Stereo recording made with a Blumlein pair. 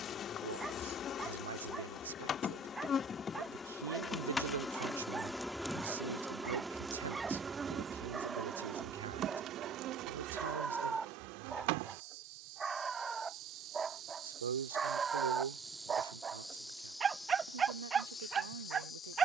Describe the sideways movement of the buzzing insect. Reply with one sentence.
In this clip you hear the buzzing insect go right and come back.